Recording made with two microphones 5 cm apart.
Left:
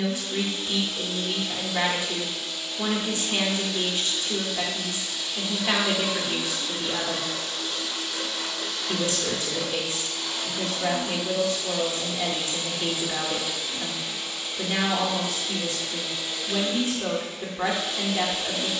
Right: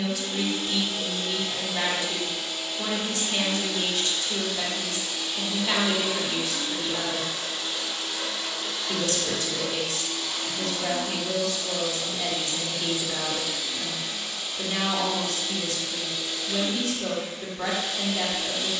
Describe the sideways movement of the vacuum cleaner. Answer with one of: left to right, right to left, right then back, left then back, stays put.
right to left.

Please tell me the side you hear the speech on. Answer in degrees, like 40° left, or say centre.
30° left.